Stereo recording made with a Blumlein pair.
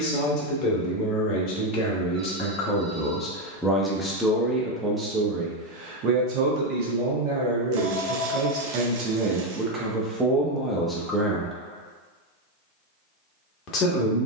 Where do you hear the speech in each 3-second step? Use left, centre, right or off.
left, centre, right, centre, left.